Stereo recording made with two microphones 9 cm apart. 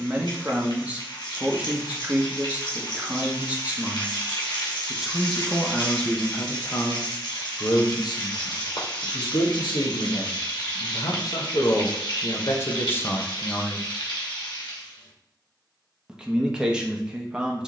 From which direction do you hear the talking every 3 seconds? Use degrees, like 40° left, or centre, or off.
20° right, 10° right, 40° left, 60° left, 30° left, 10° right.